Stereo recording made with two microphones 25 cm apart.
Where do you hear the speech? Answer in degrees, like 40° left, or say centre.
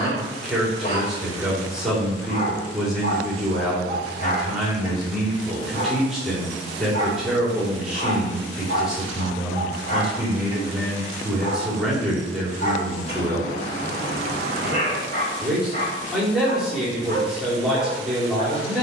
centre.